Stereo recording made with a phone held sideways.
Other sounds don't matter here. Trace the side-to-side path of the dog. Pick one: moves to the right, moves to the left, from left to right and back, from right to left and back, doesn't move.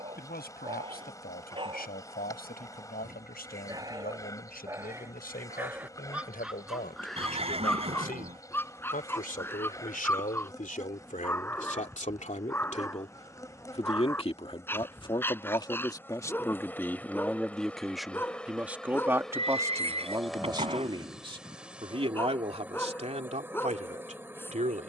moves to the left.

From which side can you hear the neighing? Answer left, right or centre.
right.